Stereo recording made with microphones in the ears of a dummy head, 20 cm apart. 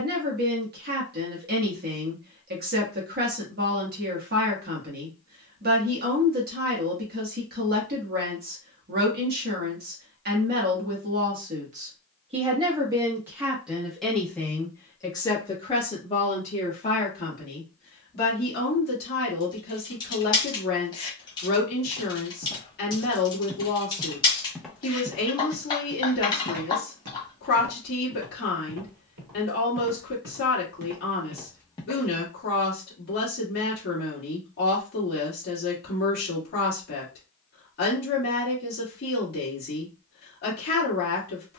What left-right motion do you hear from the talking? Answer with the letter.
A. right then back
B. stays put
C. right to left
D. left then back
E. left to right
C.